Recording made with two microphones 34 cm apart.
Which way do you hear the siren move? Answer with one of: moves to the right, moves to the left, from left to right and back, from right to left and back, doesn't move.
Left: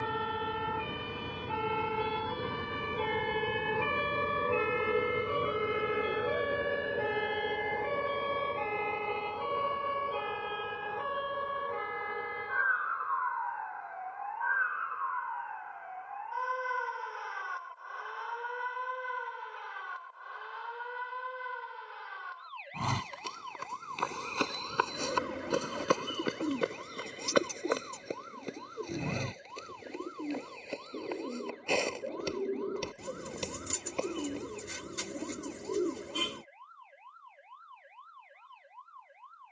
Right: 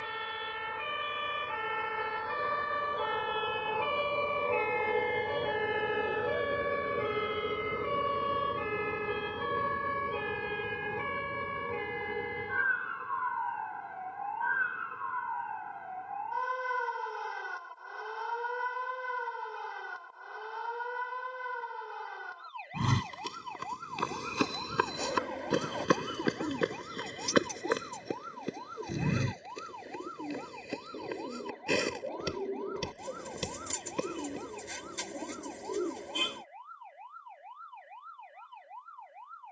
moves to the right.